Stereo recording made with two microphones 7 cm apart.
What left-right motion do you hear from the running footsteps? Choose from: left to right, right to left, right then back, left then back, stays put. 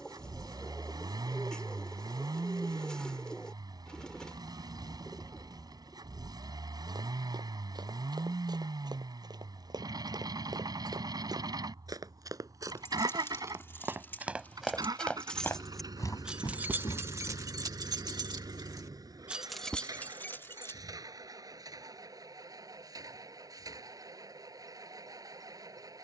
right to left.